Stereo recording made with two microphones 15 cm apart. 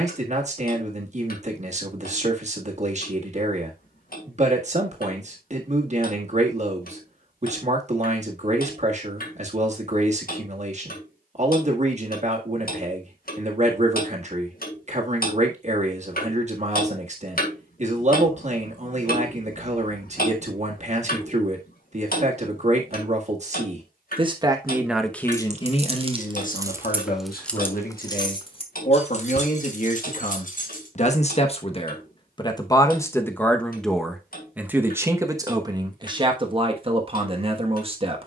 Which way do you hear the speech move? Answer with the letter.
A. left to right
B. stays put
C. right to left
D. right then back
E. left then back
E.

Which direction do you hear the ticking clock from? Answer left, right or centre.
left.